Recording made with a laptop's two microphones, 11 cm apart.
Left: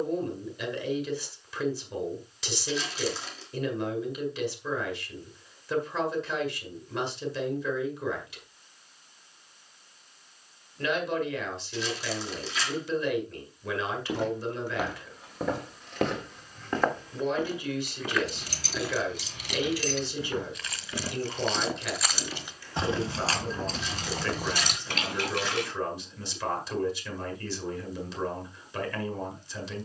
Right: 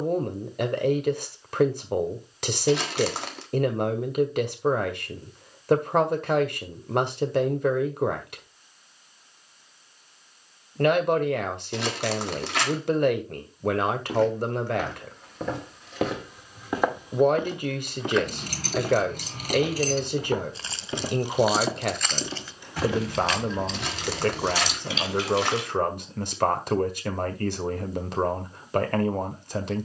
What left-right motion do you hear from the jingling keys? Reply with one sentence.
In this clip you hear the jingling keys move from right to left.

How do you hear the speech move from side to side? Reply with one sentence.
In this clip you hear the speech stay in one place.